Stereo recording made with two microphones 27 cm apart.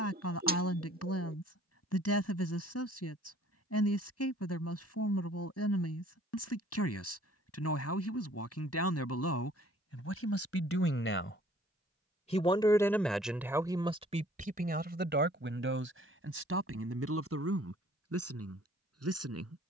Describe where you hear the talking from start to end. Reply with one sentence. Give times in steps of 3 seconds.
In this clip you hear the talking on the left from 0 s, in the centre from 12 s and on the right from 15 s.